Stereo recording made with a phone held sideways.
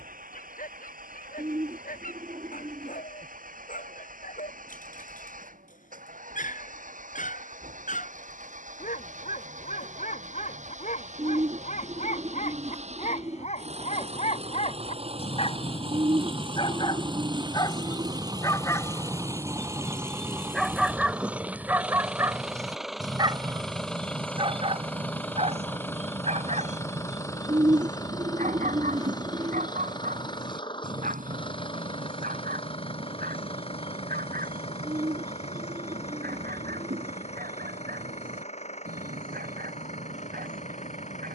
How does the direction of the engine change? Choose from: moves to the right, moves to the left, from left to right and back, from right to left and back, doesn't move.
moves to the left.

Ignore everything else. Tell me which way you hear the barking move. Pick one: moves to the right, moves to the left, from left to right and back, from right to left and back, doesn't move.
moves to the right.